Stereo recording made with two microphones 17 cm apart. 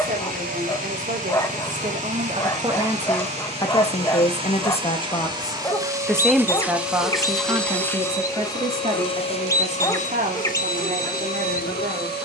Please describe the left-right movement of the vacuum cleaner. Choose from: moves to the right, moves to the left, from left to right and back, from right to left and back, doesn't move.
moves to the left.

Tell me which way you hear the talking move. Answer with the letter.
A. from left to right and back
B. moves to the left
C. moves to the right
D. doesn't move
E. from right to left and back
E.